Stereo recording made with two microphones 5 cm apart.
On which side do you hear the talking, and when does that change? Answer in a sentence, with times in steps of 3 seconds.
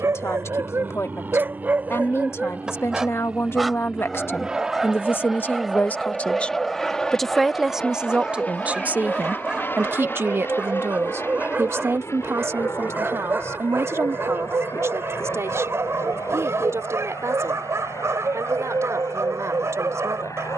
In this clip you hear the talking on the left from 0 s, in the centre from 6 s and on the right from 9 s.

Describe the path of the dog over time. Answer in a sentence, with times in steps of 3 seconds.
You can hear the dog on the right from 0 s, in the centre from 3 s and on the right from 9 s.